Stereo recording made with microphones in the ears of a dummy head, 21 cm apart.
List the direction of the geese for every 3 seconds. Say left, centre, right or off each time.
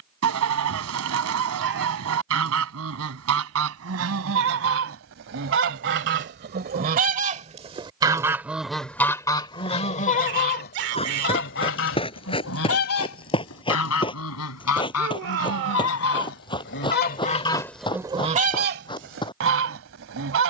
right, right, right, left, left, left, right.